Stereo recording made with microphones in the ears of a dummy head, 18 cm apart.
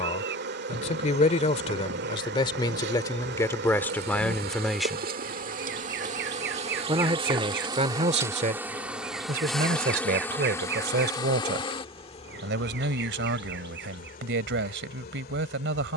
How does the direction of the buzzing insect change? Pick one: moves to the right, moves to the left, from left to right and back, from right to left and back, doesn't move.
moves to the left.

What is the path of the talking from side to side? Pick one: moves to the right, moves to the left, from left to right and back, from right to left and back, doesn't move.
moves to the right.